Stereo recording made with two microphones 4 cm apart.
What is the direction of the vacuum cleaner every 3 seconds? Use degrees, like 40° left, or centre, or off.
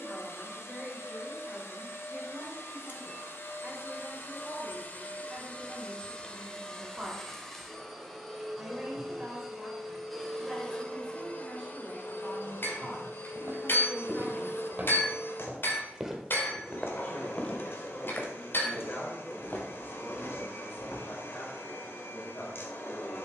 70° left, 50° left, 10° left, 10° left, 60° left, 60° left, 60° left, 60° left.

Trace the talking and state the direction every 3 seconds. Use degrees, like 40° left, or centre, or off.
20° right, 20° right, 20° right, 10° right, 10° left, 40° left, 50° left, 60° left.